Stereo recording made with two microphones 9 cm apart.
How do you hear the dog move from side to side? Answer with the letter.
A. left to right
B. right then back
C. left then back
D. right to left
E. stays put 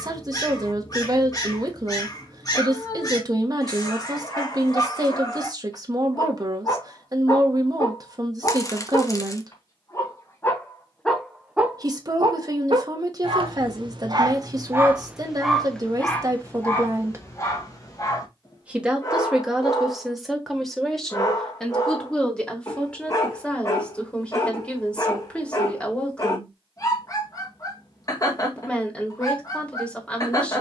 B.